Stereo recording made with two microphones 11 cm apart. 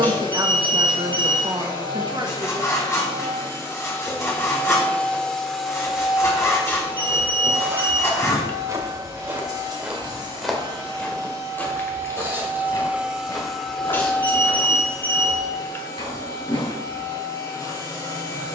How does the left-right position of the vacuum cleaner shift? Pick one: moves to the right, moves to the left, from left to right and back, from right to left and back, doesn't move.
from left to right and back.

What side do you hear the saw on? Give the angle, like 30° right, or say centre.
30° left.